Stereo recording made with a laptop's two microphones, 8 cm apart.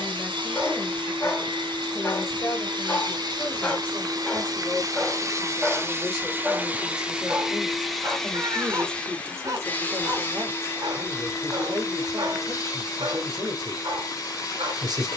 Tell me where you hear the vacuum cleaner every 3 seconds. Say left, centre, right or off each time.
right, right, centre, left, left.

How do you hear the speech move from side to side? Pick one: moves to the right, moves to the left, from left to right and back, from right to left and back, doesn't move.
moves to the right.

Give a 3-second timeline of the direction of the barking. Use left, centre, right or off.
left, centre, right, right, right.